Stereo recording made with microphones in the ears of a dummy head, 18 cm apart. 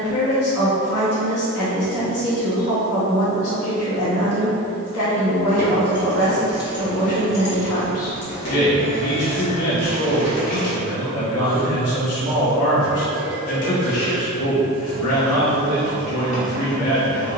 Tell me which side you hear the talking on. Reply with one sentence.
You can hear the talking on the left.